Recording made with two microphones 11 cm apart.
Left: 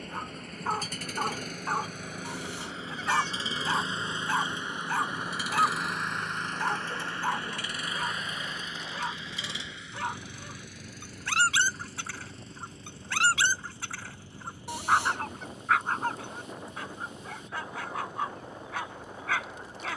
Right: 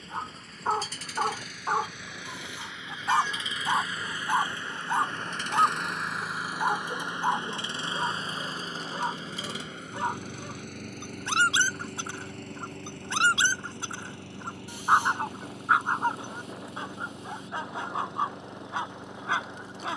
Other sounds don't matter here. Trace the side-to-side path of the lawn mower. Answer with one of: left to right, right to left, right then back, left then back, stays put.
left to right.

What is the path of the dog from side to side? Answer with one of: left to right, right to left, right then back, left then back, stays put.
stays put.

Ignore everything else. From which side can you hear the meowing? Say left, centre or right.
left.